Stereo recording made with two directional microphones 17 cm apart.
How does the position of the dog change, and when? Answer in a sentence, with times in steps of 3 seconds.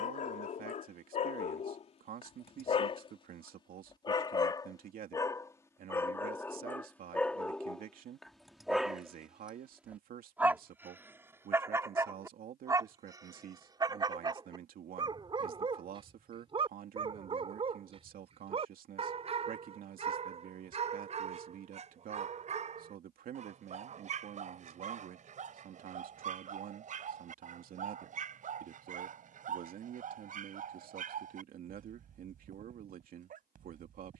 In this clip you hear the dog on the left from 0 s, in the centre from 6 s and on the right from 12 s.